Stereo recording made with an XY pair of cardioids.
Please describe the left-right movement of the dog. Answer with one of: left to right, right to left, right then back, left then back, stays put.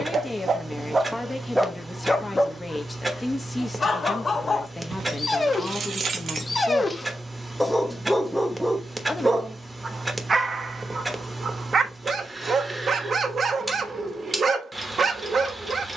left then back.